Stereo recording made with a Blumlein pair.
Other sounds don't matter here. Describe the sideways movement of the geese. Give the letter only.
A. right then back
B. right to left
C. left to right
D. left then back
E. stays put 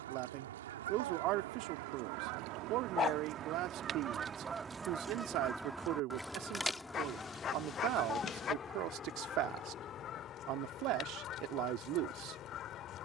B.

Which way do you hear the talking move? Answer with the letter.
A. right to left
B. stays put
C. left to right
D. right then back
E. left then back
B.